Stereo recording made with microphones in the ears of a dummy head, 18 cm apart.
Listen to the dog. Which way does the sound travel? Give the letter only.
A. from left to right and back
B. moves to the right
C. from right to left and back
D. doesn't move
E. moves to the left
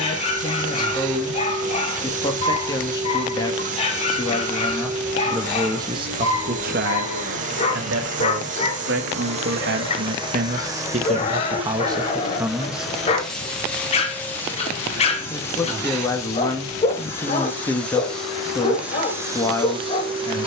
D.